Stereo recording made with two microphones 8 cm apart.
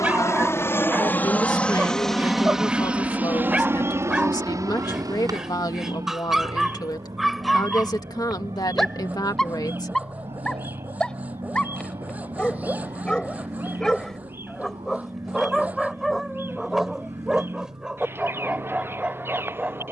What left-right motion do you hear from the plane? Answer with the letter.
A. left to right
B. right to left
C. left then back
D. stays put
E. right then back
A.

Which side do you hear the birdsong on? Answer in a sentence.
You can hear the birdsong on the right.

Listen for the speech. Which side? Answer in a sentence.
You can hear the speech on the left.